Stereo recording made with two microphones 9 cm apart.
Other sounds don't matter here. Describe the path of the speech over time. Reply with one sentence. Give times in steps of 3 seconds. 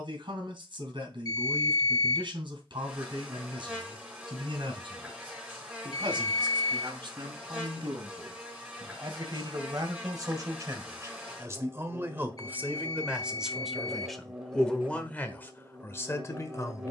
You can hear the speech on the right from 0 s, in the centre from 12 s and on the left from 15 s.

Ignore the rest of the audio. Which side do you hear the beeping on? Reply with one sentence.
You can hear the beeping on the left.